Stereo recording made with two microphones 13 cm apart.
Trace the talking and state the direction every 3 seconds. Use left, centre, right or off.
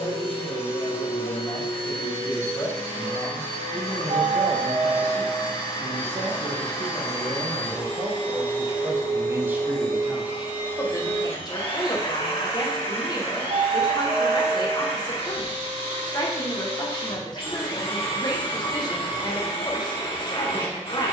left, centre, right, centre, left, left, left.